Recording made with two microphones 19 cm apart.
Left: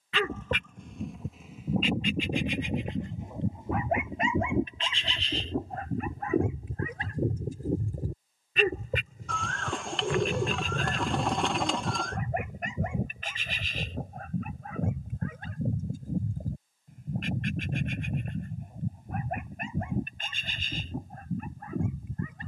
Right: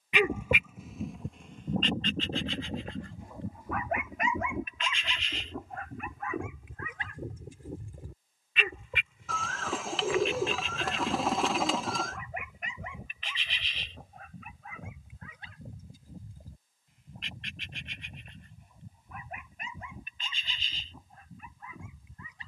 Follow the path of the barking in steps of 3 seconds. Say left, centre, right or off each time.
centre, left, left, left, left, left, left, left.